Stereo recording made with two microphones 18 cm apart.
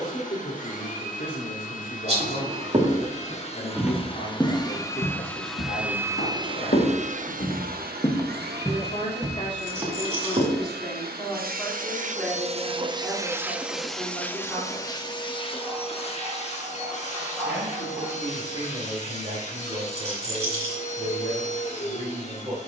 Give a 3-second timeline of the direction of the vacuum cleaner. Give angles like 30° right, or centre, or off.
50° left, 20° left, 50° right, 70° right, 10° right, 40° left, 40° left, 40° left.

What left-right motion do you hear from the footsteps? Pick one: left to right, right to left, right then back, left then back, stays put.
left then back.